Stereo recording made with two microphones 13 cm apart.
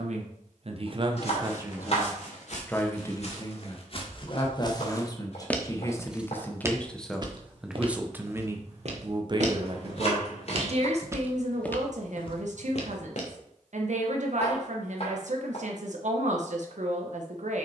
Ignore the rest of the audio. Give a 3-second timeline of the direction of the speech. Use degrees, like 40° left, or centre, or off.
20° right, 30° left, centre, 50° right, 60° right, 60° right.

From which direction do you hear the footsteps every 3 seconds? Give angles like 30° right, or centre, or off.
60° left, 30° left, 40° right, 30° right, 50° left, off.